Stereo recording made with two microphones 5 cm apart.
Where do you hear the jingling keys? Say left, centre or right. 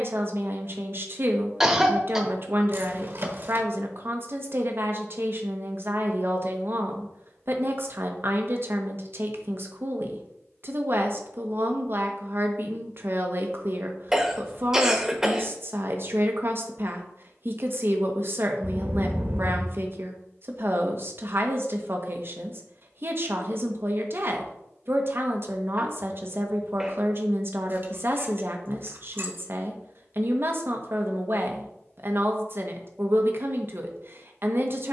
right.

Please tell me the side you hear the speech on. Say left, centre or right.
right.